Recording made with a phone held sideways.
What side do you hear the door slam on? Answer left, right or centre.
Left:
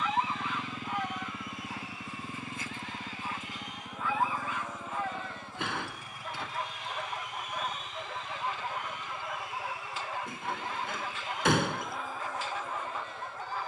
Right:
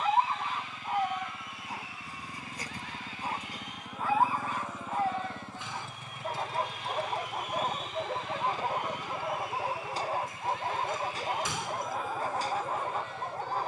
left.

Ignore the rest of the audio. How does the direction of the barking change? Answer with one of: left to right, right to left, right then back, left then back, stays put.
stays put.